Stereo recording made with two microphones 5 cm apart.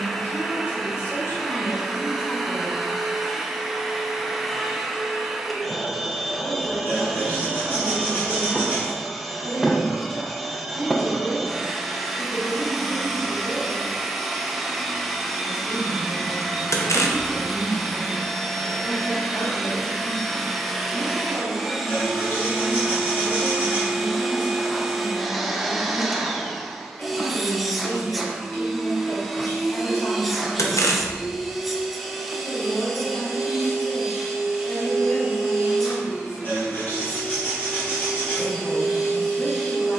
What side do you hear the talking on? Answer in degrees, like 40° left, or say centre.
50° left.